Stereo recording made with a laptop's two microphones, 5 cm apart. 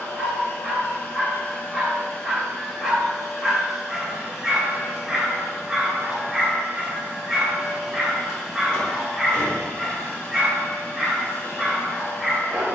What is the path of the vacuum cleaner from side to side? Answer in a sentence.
You can hear the vacuum cleaner go right and come back.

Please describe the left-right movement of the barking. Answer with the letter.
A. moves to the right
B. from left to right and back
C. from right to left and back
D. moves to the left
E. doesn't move
E.